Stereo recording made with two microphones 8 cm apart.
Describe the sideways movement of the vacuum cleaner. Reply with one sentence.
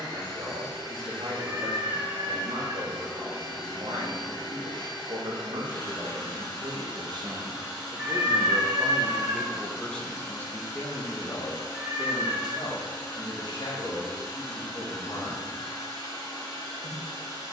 In this clip you hear the vacuum cleaner stay put.